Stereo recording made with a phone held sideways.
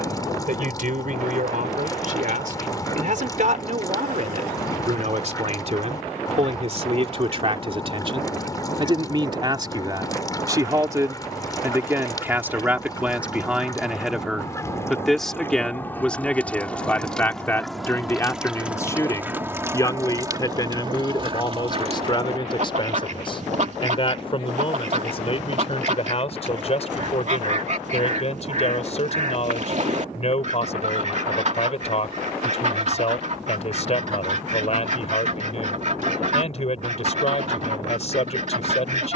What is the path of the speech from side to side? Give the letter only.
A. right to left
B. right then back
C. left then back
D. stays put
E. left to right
A.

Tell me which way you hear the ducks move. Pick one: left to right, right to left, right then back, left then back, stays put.
left to right.